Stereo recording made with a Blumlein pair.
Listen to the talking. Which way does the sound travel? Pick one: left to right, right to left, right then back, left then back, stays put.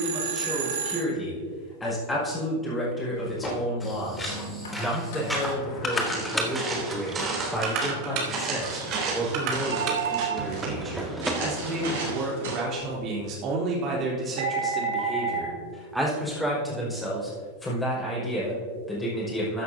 right then back.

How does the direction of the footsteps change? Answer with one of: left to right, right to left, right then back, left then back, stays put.
left to right.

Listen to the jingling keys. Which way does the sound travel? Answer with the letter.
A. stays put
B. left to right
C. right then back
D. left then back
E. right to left
C.